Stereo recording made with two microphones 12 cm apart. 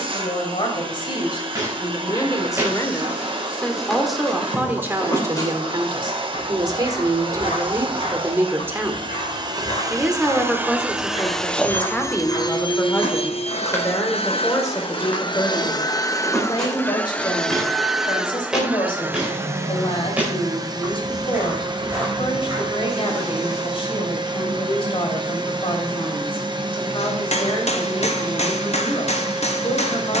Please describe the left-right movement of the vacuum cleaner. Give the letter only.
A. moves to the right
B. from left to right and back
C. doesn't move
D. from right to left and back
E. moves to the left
D.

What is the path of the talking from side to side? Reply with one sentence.
You can hear the talking move from left to right and back again.